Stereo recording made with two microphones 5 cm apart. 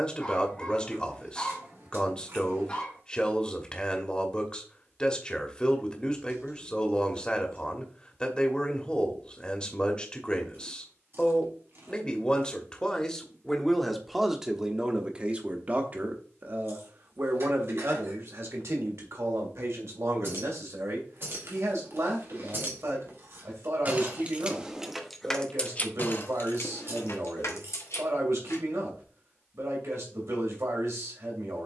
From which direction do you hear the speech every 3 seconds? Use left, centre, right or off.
left, left, left, left, centre, right, right, right, right, right, right.